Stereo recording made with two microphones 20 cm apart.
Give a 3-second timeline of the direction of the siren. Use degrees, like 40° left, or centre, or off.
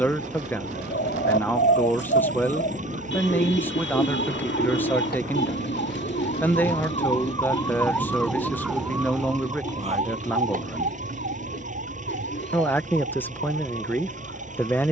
70° left, 60° left, 20° left, 40° right, 60° right.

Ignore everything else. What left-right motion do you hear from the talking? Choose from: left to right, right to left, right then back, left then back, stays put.
stays put.